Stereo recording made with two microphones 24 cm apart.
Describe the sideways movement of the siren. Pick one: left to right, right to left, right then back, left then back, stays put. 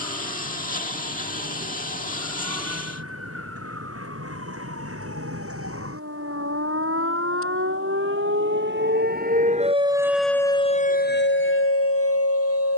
right to left.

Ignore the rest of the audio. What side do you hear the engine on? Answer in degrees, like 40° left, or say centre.
30° left.